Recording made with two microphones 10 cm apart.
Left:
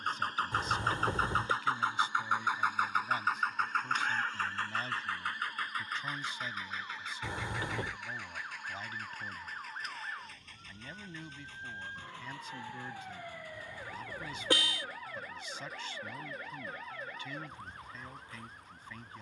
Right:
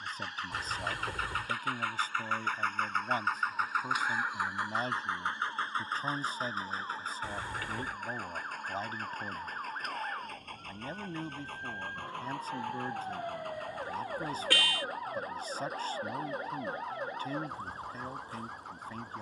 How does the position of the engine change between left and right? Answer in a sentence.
In this clip you hear the engine move from left to right.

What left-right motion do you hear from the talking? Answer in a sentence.
You can hear the talking stay put.